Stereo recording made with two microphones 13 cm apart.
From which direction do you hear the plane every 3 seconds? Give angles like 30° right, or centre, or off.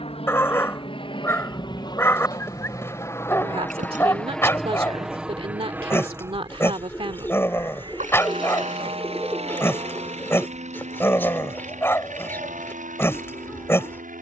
40° left, centre, 30° right, 50° right, 60° right.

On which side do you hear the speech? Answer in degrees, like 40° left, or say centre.
40° right.